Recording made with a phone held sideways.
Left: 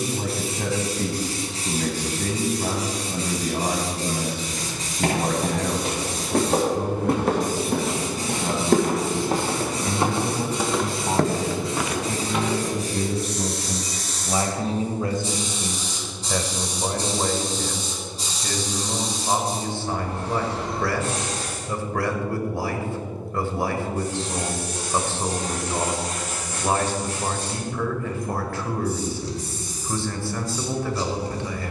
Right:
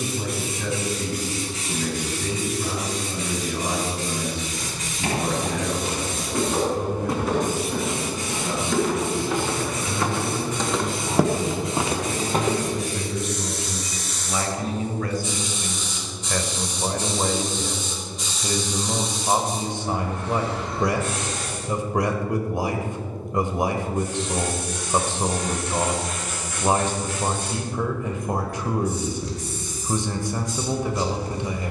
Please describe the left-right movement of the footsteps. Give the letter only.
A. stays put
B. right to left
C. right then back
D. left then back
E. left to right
E.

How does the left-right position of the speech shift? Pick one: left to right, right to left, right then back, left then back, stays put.
left to right.